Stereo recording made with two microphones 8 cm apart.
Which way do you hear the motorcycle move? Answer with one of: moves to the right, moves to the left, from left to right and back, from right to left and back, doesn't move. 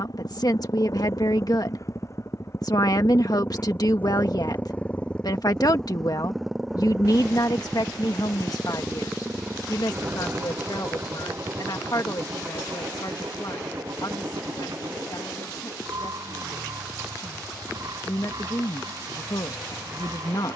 moves to the right.